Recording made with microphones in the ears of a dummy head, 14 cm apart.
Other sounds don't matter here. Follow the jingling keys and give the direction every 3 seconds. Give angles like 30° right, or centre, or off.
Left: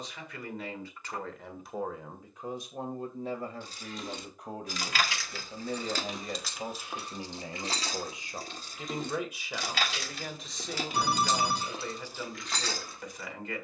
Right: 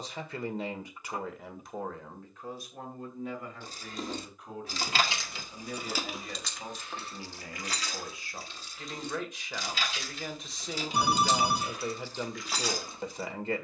off, 20° right, 20° left, 40° left, 10° right.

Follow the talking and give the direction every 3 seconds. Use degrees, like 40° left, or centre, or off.
centre, 30° left, 20° left, centre, 20° right.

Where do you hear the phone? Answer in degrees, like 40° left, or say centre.
10° right.